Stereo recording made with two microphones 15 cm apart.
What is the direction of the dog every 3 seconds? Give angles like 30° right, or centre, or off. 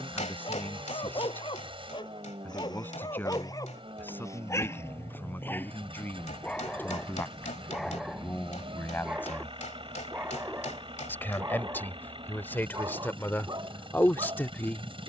30° left, 20° left, centre, 20° right, 30° right.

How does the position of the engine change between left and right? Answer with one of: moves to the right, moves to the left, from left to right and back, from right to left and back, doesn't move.
doesn't move.